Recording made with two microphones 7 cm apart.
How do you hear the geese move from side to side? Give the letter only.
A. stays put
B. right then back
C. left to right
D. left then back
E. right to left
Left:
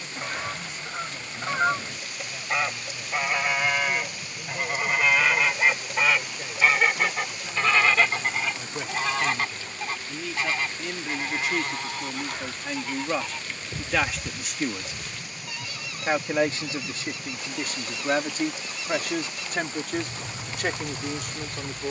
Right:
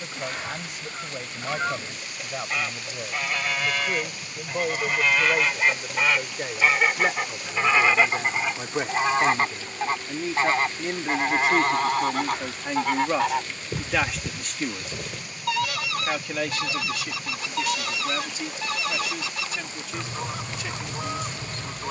C.